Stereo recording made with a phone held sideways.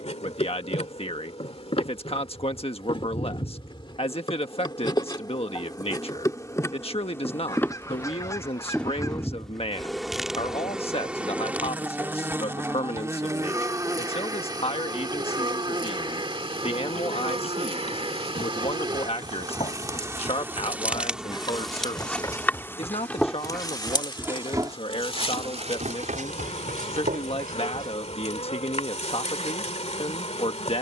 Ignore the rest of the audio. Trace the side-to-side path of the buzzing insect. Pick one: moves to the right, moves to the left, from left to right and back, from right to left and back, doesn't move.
from left to right and back.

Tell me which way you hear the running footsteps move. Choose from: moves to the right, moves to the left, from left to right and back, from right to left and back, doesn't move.
moves to the right.